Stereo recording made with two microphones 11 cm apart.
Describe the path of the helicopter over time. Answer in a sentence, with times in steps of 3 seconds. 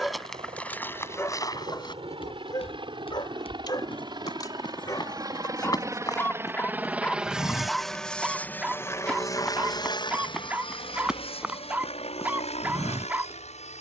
You can hear the helicopter on the right from 0 s, in the centre from 6 s and on the left from 9 s.